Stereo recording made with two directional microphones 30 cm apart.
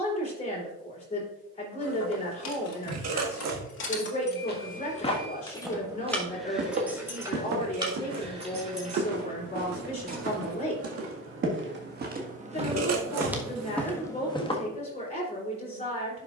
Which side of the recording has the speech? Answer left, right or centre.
left.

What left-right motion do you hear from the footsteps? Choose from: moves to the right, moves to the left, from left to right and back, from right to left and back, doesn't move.
from left to right and back.